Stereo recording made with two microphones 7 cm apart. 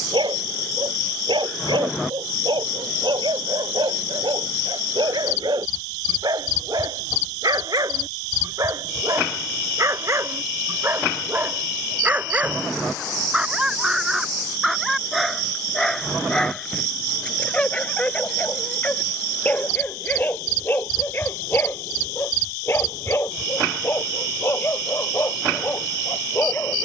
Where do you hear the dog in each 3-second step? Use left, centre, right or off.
right, right, right, right, centre, centre, left, left, left.